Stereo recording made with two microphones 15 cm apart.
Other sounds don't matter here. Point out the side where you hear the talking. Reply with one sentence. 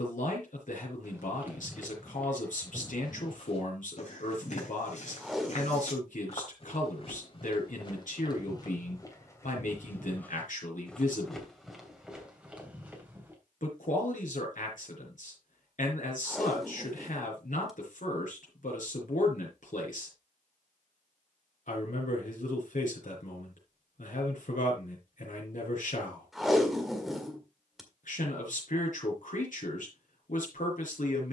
You can hear the talking on the left.